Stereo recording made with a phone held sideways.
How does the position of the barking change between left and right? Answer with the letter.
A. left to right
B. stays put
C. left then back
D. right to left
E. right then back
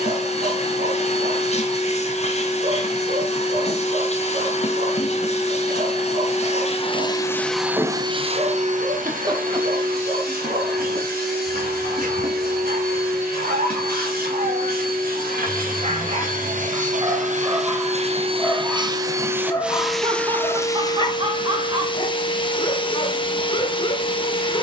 D.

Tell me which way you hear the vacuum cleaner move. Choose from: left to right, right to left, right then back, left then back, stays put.
right then back.